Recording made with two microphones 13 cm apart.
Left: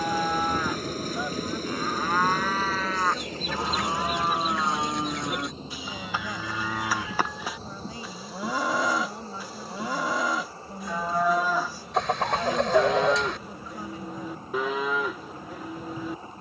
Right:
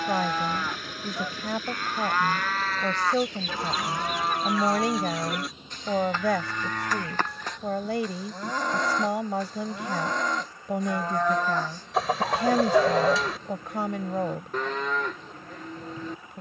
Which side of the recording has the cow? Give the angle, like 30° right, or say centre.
10° left.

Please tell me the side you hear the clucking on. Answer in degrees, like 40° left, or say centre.
centre.